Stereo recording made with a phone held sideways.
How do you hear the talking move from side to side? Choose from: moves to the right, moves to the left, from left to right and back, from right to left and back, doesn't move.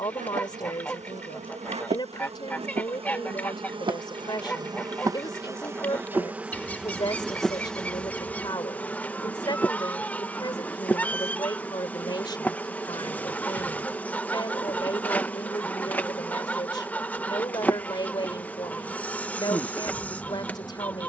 doesn't move.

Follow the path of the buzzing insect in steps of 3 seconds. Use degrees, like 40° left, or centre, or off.
50° right, 30° right, centre, 10° left, 10° left, 10° left, 10° left.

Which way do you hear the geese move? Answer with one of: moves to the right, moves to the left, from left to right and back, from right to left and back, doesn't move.
doesn't move.